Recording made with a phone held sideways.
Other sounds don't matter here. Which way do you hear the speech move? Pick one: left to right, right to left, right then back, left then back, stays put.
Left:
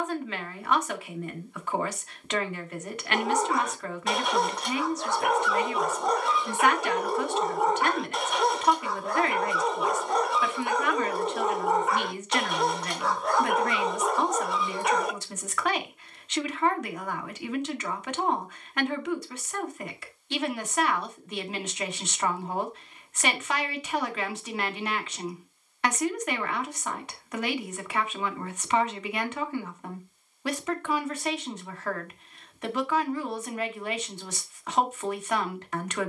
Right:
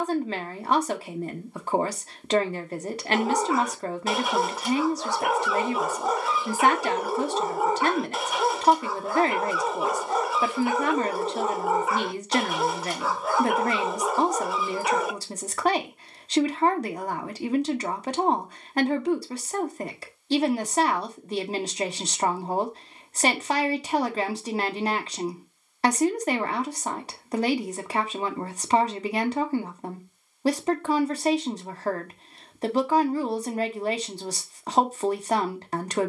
stays put.